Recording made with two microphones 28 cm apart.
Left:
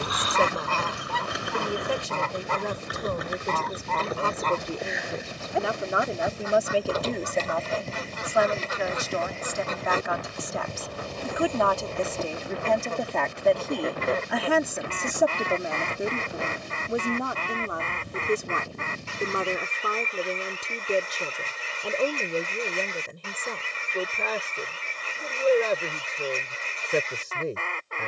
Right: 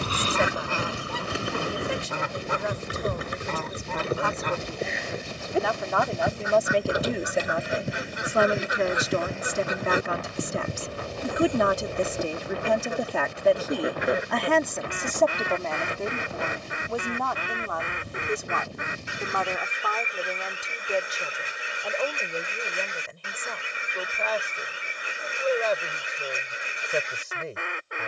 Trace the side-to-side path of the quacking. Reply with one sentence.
You can hear the quacking stay in one place.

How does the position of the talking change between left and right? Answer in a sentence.
In this clip you hear the talking go right and come back.